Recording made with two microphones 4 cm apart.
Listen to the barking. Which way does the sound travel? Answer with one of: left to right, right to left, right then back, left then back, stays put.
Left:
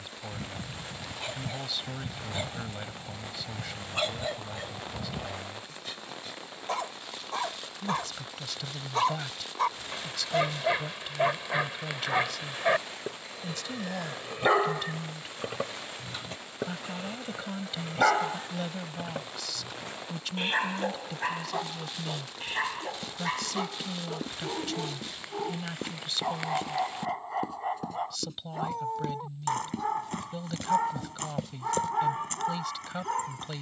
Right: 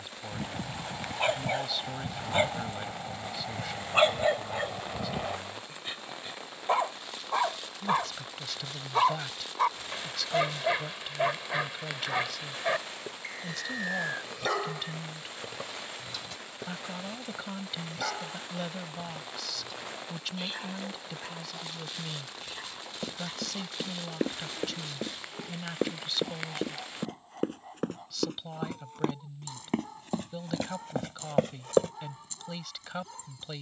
right to left.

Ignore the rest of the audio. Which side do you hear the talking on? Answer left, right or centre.
centre.